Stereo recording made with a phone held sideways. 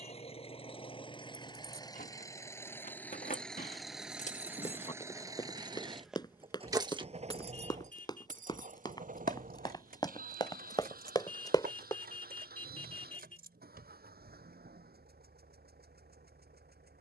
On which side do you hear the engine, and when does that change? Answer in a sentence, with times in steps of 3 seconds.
You can hear the engine on the left from 0 s, in the centre from 3 s and on the right from 6 s.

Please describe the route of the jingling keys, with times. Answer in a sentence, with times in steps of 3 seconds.
In this clip you hear the jingling keys on the left from 0 s, on the right from 6 s and not at all from 15 s.